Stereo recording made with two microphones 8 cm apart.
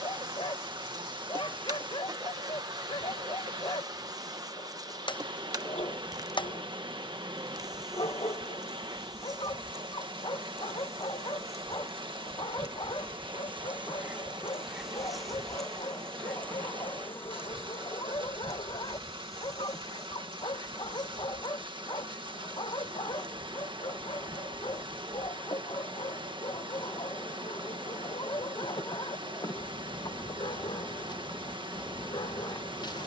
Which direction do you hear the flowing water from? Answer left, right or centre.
right.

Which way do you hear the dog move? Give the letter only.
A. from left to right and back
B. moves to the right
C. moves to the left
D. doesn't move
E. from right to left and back
D.